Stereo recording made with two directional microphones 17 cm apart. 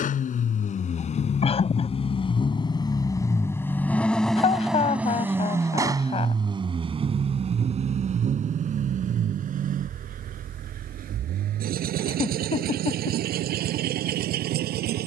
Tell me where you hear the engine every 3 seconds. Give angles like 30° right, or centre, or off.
40° left, centre, 40° right, 60° right, 70° right.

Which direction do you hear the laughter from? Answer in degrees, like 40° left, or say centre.
40° left.